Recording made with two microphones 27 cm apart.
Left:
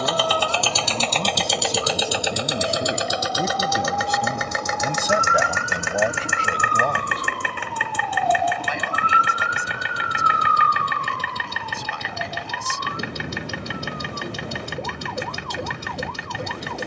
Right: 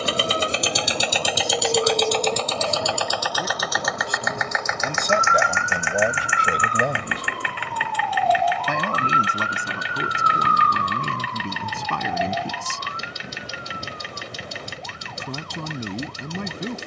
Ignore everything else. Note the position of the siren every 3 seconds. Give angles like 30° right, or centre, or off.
50° right, 30° right, centre, 30° left, 50° left, 60° left.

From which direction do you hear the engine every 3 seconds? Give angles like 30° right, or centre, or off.
centre, 30° left, 50° left, 60° left, 60° left, 60° left.